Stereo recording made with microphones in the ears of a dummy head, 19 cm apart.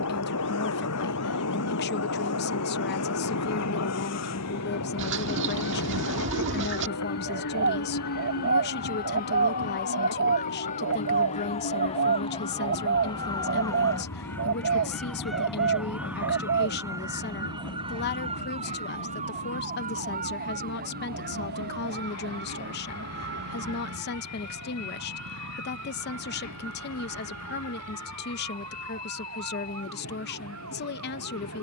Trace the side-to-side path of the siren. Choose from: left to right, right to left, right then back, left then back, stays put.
left to right.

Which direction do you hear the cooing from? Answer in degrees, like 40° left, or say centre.
60° right.